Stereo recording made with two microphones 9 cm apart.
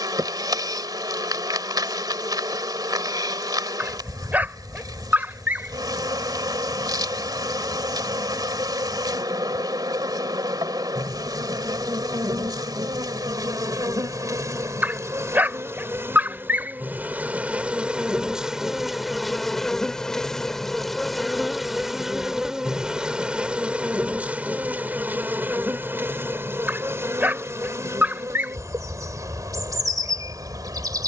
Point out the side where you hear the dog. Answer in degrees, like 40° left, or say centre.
20° right.